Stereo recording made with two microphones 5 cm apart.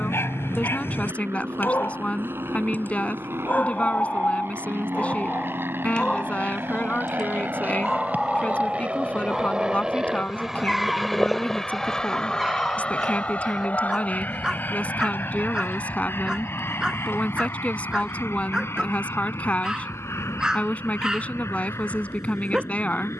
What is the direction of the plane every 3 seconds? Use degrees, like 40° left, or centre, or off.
70° right, 60° right, 40° right, 10° right, 30° left, 50° left, 60° left, 70° left.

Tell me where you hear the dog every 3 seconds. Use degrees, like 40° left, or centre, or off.
50° left, 30° left, 10° left, centre, 10° right, 10° right, 10° right, 10° right.